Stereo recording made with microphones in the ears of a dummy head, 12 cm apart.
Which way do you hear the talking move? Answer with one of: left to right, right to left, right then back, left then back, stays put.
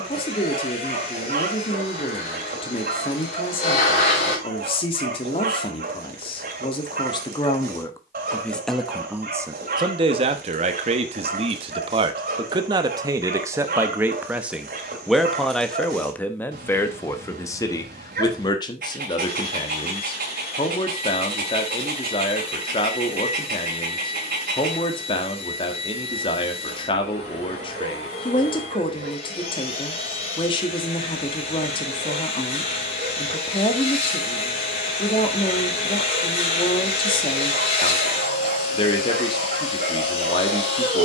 right then back.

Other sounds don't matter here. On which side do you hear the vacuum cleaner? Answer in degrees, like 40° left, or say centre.
50° left.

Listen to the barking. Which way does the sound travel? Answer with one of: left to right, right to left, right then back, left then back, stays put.
stays put.